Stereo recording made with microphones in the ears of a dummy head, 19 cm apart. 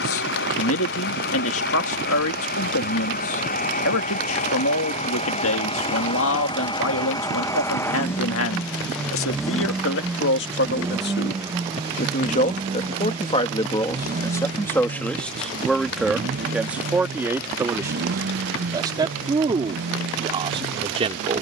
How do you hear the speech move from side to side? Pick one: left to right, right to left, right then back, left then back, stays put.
left to right.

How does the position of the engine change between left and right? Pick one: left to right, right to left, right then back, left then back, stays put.
left to right.